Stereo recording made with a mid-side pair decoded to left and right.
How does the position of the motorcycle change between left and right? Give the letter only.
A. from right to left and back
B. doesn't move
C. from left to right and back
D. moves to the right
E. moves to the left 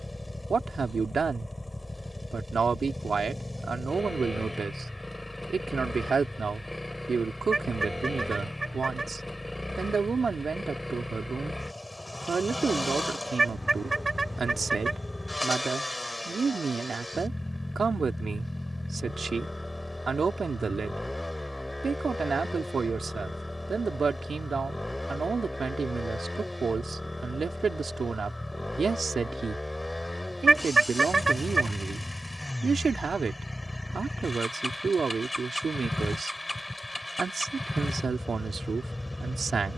B.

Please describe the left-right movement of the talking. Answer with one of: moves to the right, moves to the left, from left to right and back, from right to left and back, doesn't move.
doesn't move.